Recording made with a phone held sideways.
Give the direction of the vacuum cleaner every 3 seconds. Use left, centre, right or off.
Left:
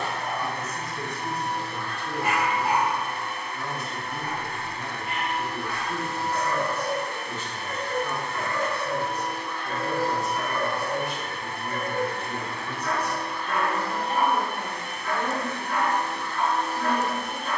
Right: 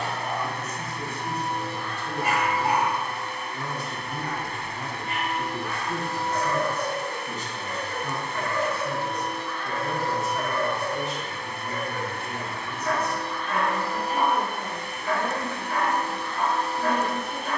right, right, right, left, centre, right.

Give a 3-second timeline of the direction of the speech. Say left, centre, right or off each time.
left, right, right, centre, left, left.